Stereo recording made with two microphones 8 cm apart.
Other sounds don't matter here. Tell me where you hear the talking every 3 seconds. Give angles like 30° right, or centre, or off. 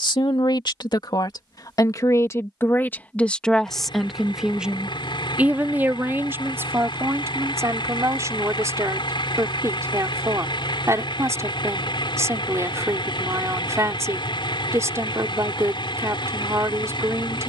50° left, centre, 30° right, 40° right, 40° right, 40° right.